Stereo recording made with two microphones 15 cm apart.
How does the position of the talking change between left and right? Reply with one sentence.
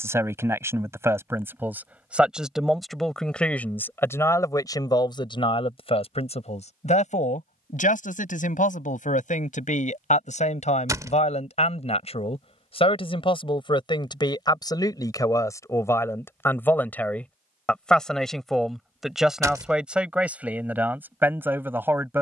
You can hear the talking move from right to left and back again.